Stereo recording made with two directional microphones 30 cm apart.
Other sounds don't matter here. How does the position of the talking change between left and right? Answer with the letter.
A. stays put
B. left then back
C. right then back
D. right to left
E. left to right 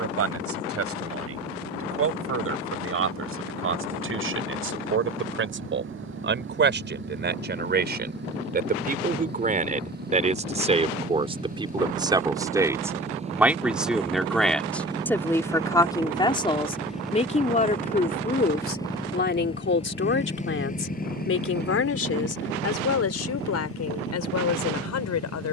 D.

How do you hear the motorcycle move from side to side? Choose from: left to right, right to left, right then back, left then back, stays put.
right to left.